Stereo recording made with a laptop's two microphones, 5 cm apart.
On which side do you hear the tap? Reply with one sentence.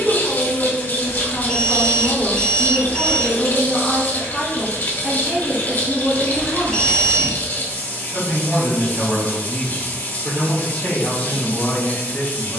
In this clip you hear the tap on the left.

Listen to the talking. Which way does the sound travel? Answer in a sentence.
In this clip you hear the talking go right and come back.